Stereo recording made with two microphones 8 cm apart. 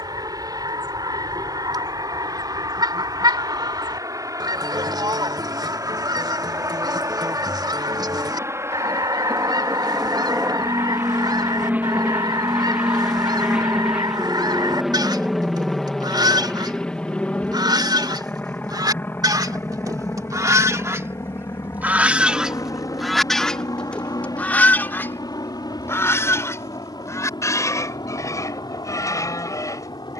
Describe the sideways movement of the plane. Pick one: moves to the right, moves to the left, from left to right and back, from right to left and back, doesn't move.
moves to the left.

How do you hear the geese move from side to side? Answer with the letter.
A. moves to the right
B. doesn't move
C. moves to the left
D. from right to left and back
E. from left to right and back
C.